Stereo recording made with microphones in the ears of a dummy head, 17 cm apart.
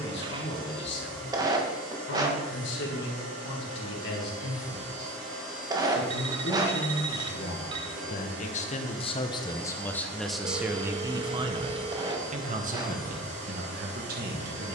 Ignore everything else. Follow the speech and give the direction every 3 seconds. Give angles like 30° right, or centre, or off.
70° left, 70° left, 50° left, centre, 50° right.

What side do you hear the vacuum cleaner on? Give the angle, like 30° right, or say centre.
80° right.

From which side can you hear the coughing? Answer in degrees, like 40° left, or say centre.
20° right.